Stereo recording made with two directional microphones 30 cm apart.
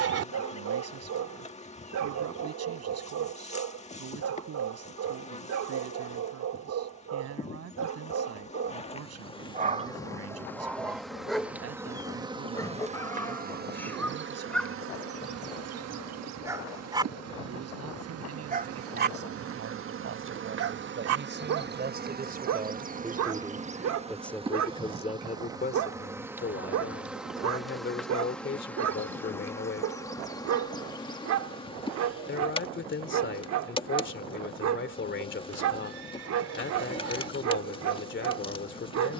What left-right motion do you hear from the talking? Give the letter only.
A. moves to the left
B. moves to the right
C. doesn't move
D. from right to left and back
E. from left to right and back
A.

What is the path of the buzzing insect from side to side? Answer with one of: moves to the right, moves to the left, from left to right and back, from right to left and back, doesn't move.
from left to right and back.